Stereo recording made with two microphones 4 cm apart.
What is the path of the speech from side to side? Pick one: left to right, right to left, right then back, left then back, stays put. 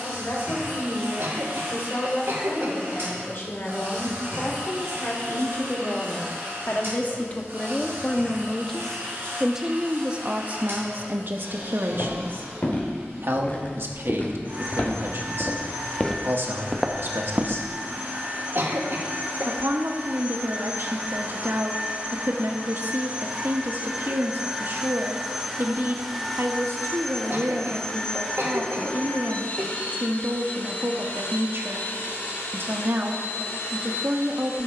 left to right.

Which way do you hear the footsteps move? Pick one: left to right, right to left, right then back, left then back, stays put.
left to right.